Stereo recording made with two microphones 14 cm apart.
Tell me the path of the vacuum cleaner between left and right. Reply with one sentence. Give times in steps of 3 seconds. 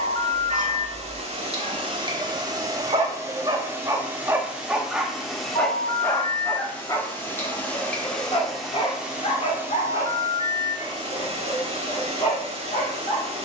You can hear the vacuum cleaner on the right from 0 s, in the centre from 3 s and on the right from 9 s.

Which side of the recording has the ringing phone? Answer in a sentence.
In this clip you hear the ringing phone on the left.